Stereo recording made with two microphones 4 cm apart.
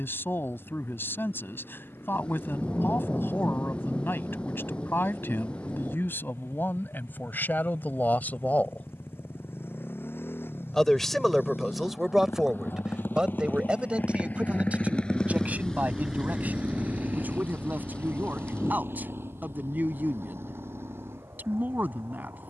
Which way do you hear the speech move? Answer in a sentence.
In this clip you hear the speech move to the right.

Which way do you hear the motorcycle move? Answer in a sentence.
You can hear the motorcycle go from the left side to the right.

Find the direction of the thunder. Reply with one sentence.
You can hear the thunder on the left.